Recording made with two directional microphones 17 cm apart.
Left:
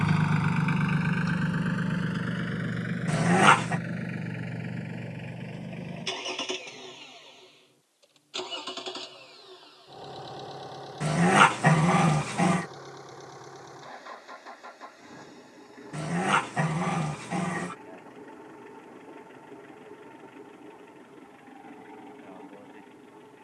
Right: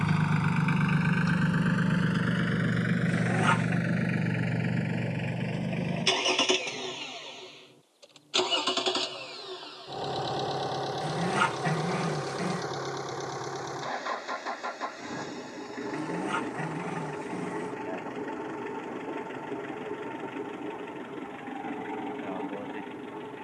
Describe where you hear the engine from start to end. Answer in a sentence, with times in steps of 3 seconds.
You can hear the engine in the centre from 0 s and on the right from 3 s.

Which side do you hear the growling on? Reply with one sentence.
In this clip you hear the growling on the left.